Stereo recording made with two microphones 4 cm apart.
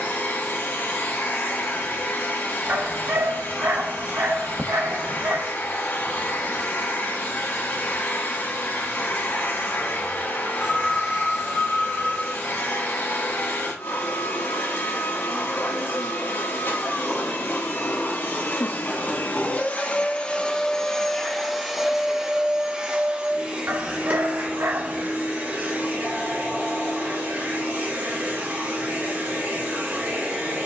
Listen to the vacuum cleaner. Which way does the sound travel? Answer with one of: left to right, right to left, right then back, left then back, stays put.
left to right.